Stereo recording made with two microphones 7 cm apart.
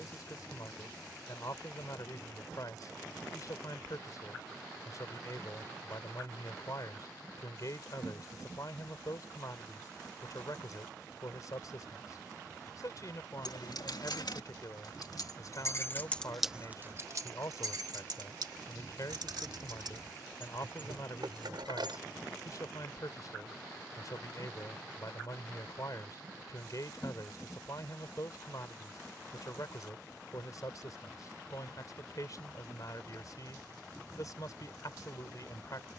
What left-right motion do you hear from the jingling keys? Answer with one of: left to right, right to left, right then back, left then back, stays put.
left to right.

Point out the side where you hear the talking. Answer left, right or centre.
left.